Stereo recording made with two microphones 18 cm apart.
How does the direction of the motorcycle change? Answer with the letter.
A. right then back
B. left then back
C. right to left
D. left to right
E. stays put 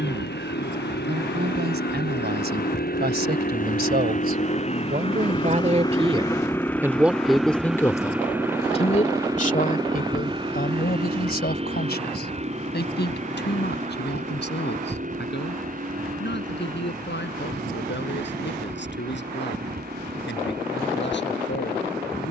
D.